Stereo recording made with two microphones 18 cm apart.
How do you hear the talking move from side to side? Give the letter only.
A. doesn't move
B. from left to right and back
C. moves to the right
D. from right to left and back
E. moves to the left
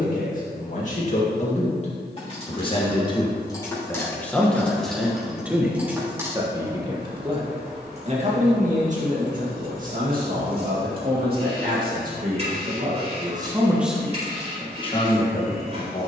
B.